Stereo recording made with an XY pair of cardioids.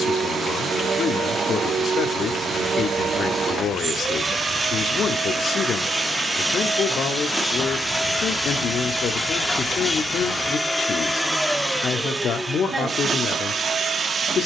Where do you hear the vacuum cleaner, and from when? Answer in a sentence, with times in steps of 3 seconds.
In this clip you hear the vacuum cleaner on the right from 0 s, in the centre from 6 s and on the right from 12 s.